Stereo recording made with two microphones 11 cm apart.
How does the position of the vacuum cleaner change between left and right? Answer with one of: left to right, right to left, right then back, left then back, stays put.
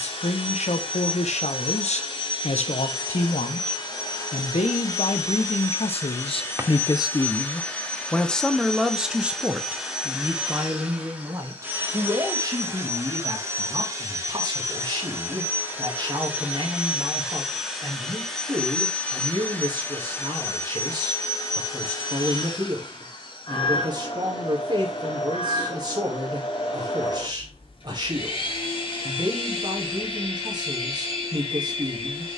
right then back.